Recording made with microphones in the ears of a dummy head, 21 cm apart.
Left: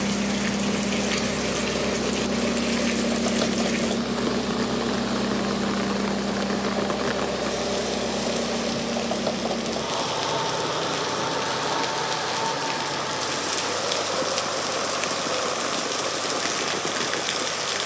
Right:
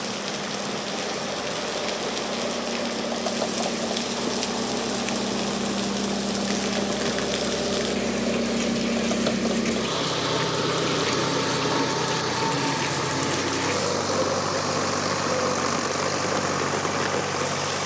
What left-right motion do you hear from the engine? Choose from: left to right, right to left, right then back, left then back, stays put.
left to right.